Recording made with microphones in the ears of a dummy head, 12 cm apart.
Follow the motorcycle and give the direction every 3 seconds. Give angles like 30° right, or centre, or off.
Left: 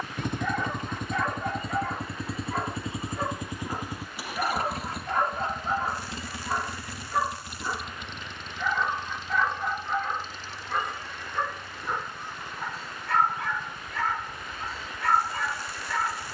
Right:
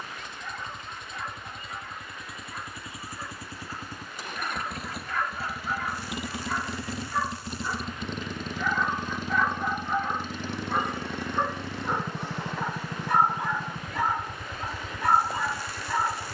30° left, centre, 30° right, 50° right, 60° right, 60° right.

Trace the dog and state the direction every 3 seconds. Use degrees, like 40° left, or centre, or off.
50° left, 30° left, 10° left, 10° right, 10° right, 10° right.